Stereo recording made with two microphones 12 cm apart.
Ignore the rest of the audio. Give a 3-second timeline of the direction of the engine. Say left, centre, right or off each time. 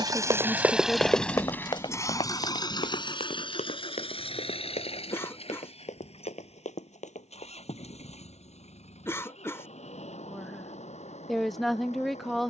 centre, left, left, left.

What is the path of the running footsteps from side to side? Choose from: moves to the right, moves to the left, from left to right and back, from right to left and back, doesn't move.
moves to the left.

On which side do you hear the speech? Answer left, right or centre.
centre.